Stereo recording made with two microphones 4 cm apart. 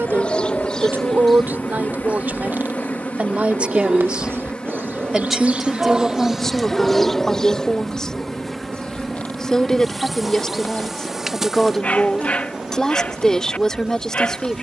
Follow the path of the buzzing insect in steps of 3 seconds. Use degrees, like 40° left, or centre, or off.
50° left, 30° left, 10° left, centre, 10° right.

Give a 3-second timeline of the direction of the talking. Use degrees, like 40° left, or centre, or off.
50° right, 20° right, 10° left, 10° left, 10° left.